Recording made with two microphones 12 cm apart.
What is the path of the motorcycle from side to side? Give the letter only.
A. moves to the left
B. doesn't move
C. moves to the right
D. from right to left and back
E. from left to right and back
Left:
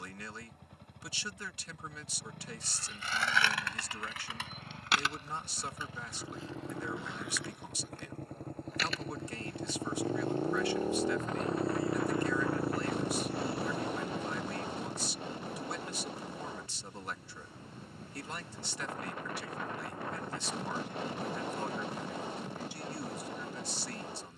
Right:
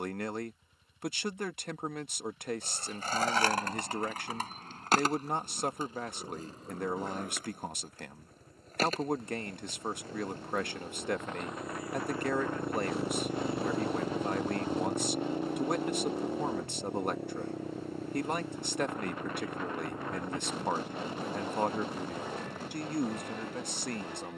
C.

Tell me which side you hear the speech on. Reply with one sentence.
You can hear the speech on the right.